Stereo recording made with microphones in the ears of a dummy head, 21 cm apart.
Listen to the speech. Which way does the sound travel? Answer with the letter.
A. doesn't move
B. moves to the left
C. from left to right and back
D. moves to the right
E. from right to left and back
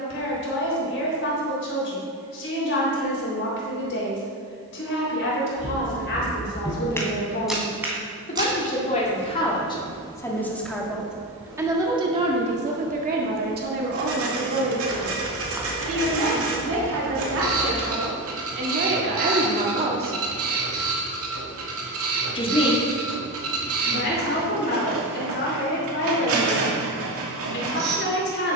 C.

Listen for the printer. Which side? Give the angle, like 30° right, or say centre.
60° right.